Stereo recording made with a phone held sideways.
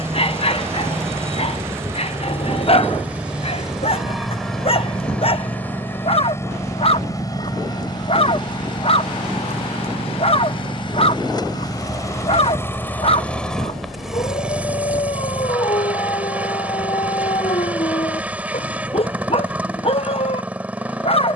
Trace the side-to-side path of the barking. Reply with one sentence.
You can hear the barking stay put.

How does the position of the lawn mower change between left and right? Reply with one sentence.
You can hear the lawn mower go left and come back.